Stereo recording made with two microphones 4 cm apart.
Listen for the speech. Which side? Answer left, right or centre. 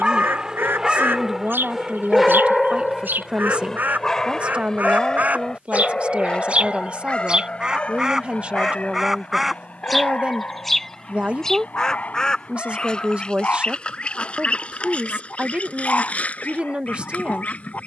right.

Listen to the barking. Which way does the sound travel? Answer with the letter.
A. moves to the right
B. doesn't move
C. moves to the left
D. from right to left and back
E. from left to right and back
C.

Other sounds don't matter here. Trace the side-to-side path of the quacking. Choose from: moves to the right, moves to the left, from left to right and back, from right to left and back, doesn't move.
moves to the left.